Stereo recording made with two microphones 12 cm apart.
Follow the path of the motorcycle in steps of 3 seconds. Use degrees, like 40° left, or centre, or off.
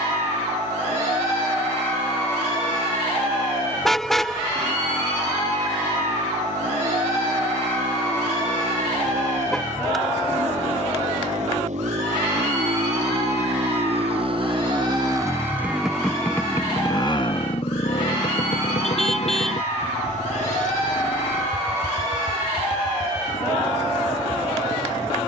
80° right, 80° right, 80° right, 70° right, 50° right, 20° left, 70° left, 80° left, 80° left.